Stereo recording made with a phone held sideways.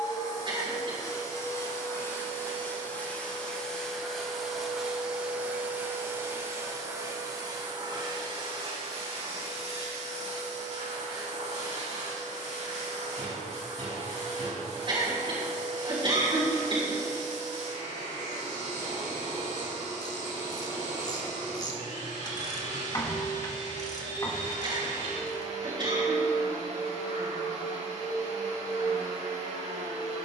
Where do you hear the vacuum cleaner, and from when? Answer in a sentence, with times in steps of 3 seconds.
You can hear the vacuum cleaner on the left from 0 s, in the centre from 3 s and on the right from 6 s.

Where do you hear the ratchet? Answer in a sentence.
You can hear the ratchet on the left.